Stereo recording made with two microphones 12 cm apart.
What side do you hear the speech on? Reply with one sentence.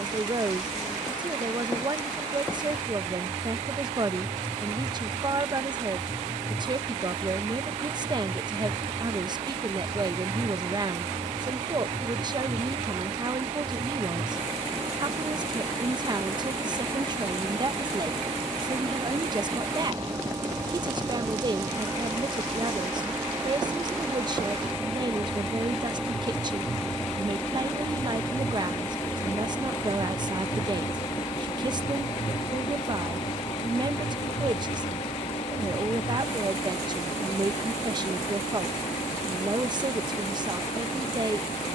In this clip you hear the speech on the right.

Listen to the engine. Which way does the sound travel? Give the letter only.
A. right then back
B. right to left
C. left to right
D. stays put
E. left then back
B.